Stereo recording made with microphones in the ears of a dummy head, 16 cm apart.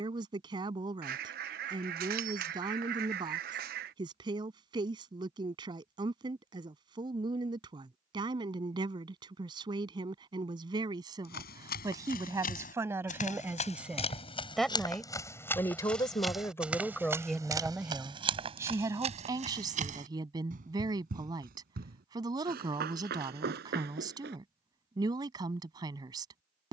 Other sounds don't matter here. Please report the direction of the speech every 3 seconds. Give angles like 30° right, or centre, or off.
20° right, 20° right, 20° right, 20° right, 10° right, 10° left, 20° right, 20° right, 20° right.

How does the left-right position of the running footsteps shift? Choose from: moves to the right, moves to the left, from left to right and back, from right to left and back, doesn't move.
moves to the right.